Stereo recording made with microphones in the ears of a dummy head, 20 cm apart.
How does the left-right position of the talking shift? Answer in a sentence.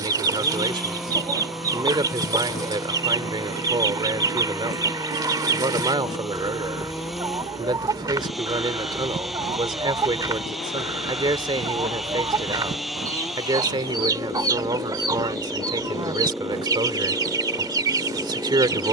In this clip you hear the talking stay in one place.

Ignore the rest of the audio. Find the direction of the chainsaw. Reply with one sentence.
You can hear the chainsaw in the centre.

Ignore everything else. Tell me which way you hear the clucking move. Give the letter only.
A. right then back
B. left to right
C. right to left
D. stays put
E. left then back
D.